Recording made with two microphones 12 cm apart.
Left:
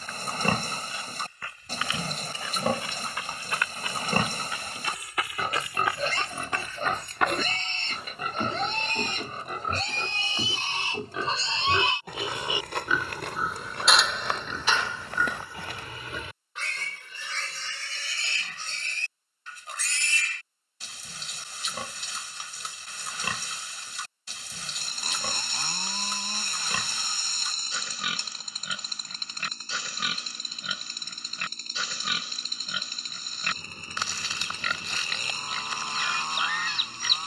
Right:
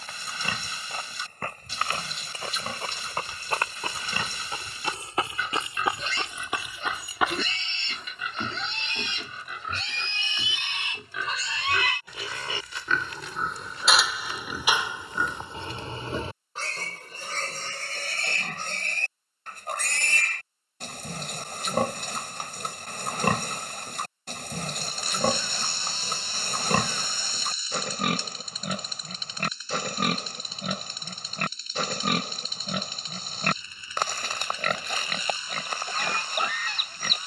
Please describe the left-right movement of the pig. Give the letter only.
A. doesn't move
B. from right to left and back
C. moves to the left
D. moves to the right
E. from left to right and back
D.